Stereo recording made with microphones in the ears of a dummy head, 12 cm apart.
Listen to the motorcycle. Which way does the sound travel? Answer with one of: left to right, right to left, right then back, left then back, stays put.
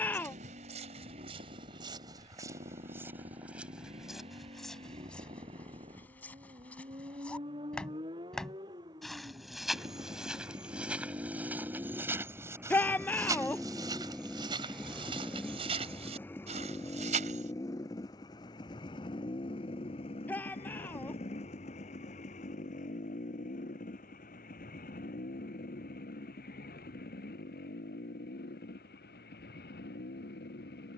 right to left.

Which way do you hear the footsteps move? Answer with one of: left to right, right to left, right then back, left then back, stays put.
left then back.